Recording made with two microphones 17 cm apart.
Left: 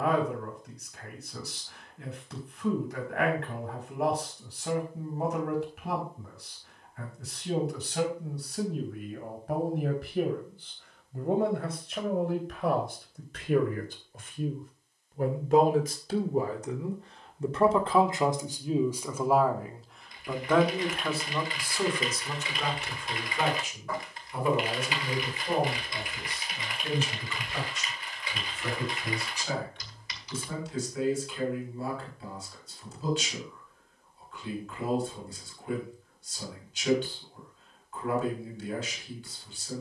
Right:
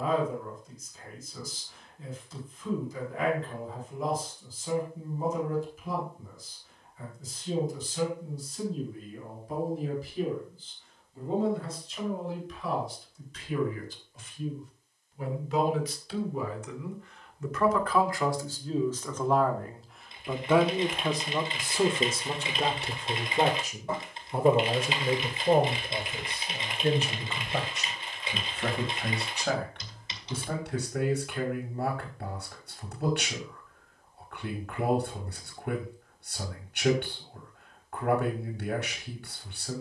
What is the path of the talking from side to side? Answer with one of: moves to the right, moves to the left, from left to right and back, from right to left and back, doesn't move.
moves to the right.